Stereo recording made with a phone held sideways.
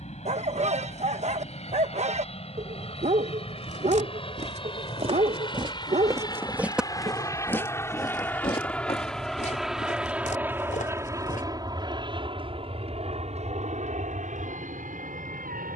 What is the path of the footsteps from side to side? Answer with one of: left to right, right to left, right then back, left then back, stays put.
right to left.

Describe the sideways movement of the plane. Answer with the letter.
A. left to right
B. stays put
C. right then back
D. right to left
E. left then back
A.